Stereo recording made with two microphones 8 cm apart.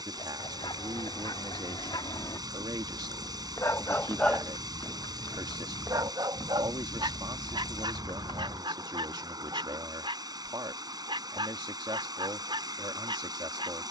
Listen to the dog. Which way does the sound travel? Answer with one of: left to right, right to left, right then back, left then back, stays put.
left to right.